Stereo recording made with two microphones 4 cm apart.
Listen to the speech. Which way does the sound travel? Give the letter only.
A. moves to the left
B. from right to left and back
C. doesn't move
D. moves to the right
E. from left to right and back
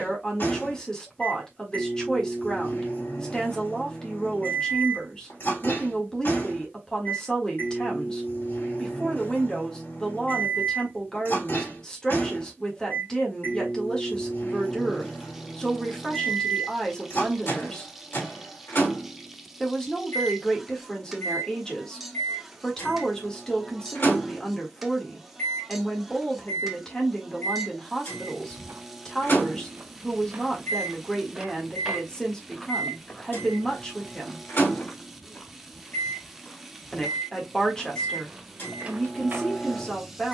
C.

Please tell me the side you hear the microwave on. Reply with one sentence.
In this clip you hear the microwave on the left.